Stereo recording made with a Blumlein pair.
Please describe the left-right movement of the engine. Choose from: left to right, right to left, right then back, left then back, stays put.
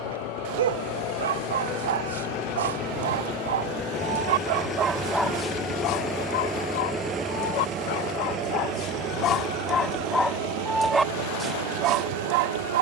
left to right.